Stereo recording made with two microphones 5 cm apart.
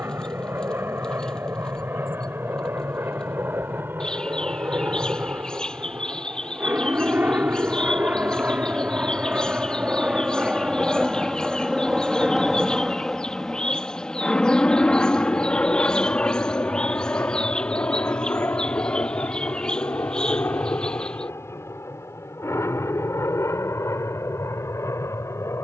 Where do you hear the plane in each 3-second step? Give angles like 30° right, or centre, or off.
60° right, 50° right, 40° right, 20° right, 10° left, 30° left, 50° left, 60° left, 70° left.